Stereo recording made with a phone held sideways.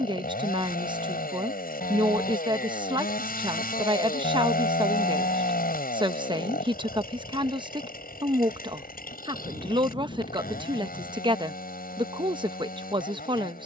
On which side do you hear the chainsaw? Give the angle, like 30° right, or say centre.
70° left.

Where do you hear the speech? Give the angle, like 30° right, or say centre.
30° right.